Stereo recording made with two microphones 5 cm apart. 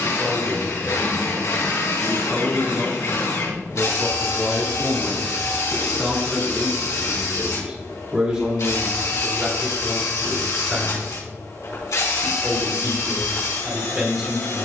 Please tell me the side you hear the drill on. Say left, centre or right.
left.